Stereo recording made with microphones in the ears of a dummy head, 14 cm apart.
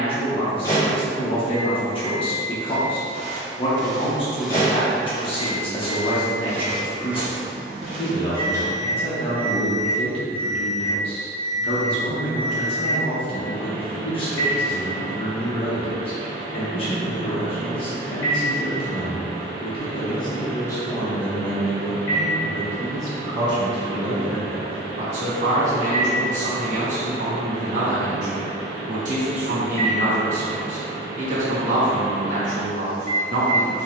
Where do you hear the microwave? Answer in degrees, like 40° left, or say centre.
20° left.